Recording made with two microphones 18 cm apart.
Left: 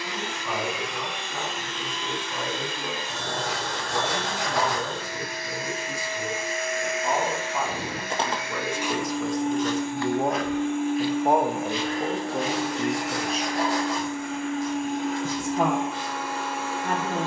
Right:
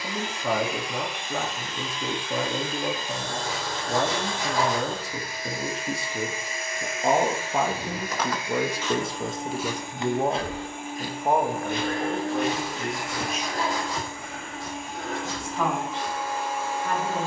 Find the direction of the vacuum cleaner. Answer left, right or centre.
left.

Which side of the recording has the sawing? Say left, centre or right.
left.